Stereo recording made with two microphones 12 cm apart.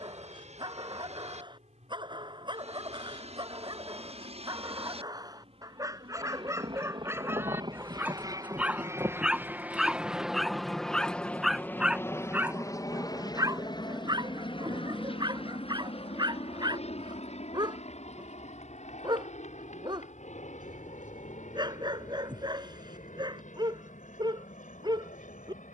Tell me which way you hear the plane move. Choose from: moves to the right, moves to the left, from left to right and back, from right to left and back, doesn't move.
moves to the left.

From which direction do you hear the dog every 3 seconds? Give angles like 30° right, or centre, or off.
40° right, 30° right, 20° right, centre, 30° right, 30° right, 30° right, 30° right, 30° right.